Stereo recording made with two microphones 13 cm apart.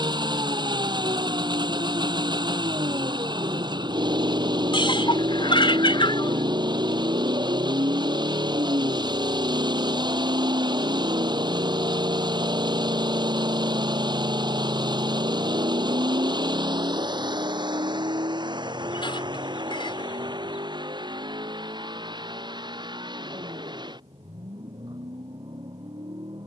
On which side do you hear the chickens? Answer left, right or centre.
left.